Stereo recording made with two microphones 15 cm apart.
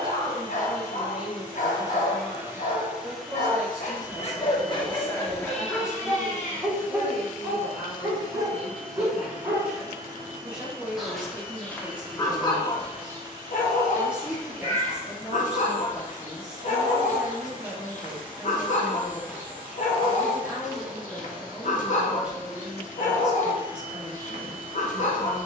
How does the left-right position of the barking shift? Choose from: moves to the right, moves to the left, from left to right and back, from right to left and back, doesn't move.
from left to right and back.